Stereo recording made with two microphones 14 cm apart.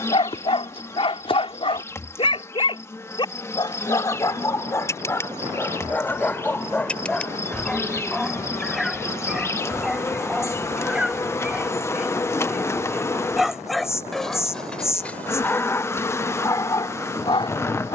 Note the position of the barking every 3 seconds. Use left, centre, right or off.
left, left, centre, centre, centre, left.